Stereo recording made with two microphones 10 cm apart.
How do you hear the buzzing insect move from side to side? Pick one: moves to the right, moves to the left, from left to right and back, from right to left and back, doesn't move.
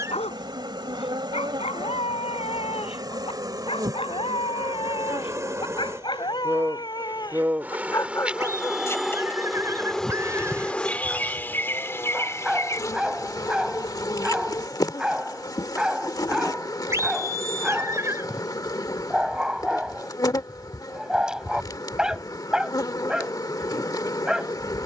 moves to the left.